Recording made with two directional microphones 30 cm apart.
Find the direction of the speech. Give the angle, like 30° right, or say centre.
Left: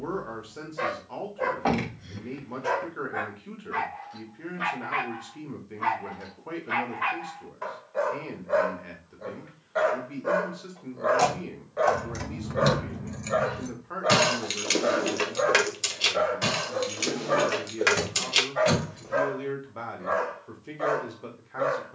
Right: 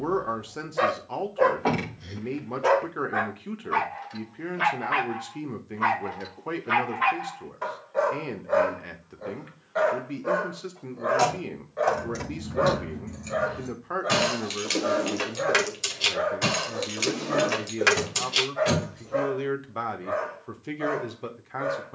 40° right.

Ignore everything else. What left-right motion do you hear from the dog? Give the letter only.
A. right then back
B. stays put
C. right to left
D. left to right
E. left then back
C.